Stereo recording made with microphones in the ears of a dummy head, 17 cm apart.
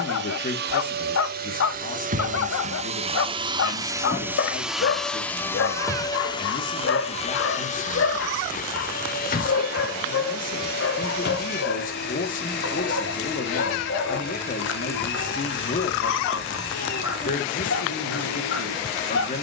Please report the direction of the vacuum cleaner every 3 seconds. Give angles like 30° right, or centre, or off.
50° right, 10° right, 40° left, 50° left, 60° left, 70° left, 70° left.